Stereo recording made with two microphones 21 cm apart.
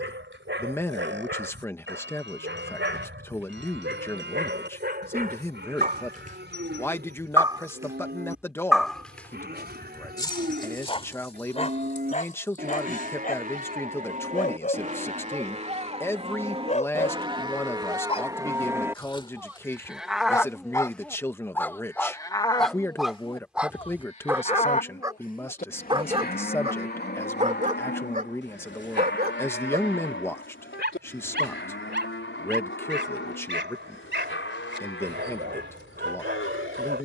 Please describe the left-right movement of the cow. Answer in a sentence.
You can hear the cow go from the right side to the left.